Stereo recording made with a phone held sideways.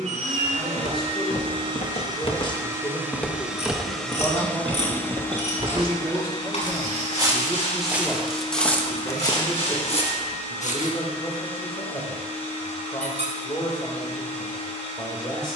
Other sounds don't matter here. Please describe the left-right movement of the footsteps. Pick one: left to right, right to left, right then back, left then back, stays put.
right then back.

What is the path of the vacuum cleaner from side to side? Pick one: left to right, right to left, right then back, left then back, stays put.
right to left.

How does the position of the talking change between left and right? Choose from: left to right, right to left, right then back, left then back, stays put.
right then back.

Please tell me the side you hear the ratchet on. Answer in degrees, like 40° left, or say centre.
60° left.